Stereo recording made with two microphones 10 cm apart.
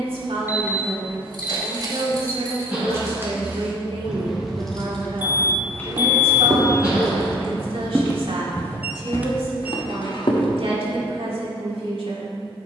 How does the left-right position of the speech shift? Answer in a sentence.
In this clip you hear the speech stay put.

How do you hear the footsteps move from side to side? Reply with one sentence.
You can hear the footsteps move from right to left.